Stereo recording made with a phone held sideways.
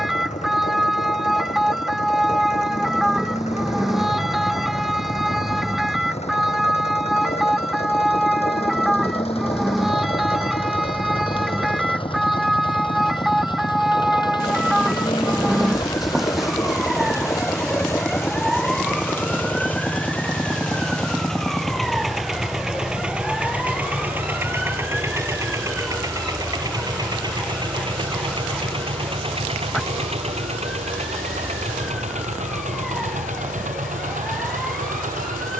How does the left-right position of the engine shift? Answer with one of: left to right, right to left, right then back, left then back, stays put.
left to right.